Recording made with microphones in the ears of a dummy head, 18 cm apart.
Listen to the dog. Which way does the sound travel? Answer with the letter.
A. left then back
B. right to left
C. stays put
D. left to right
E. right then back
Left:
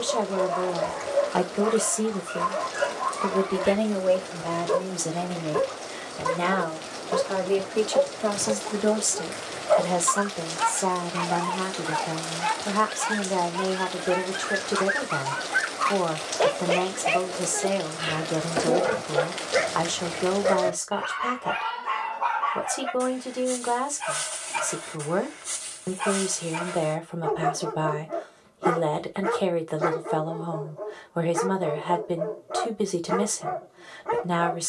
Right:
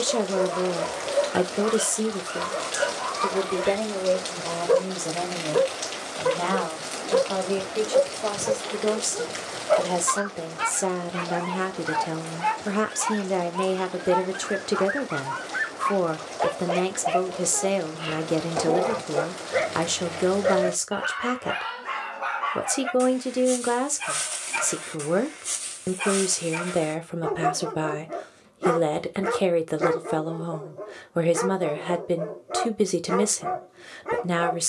A.